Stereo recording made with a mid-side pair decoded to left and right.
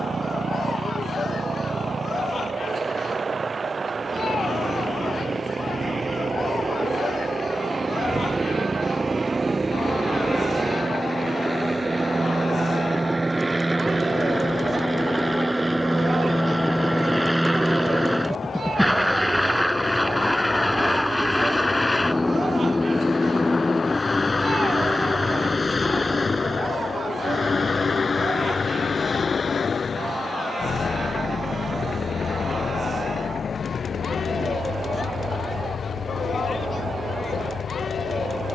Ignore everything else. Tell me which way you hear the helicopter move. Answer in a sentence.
In this clip you hear the helicopter move to the left.